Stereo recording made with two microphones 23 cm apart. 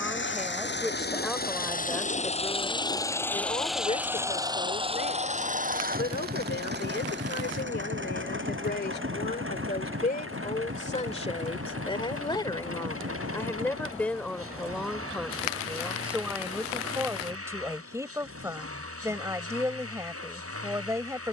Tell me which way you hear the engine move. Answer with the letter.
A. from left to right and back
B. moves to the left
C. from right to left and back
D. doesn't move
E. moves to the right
E.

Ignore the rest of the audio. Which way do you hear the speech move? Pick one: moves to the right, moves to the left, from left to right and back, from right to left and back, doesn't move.
from right to left and back.